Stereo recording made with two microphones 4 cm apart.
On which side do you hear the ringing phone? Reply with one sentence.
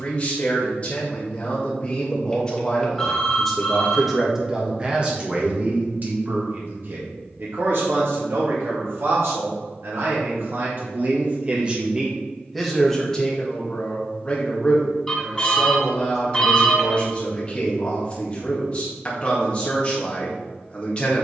In this clip you hear the ringing phone in the centre.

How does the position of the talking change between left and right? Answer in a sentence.
In this clip you hear the talking go right and come back.